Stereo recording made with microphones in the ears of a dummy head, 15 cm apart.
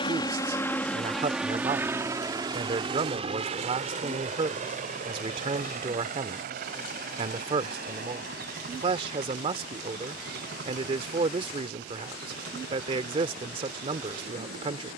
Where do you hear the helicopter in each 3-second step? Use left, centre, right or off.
centre, right, right, right, right.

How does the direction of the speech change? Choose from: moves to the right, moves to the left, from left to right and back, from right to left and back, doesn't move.
doesn't move.